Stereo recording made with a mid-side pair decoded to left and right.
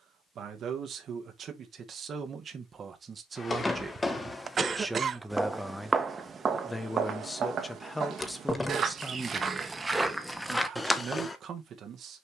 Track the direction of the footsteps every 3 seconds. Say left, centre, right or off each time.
off, centre, right, centre.